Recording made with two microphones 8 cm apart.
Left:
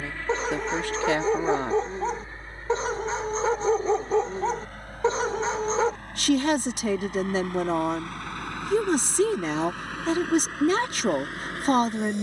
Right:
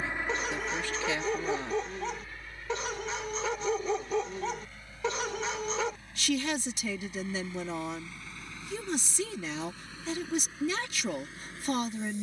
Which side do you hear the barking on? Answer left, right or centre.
left.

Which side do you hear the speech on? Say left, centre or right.
left.